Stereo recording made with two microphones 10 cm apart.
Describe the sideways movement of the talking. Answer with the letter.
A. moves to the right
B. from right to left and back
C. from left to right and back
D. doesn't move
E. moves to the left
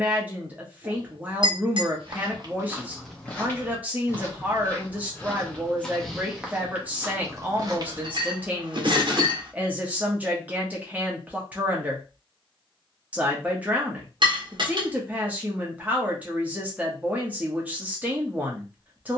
D.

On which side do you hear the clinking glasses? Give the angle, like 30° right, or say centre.
50° right.